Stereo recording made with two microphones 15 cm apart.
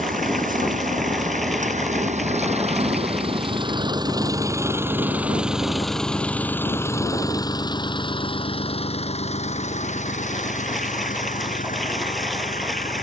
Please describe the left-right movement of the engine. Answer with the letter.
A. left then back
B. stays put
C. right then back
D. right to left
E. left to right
D.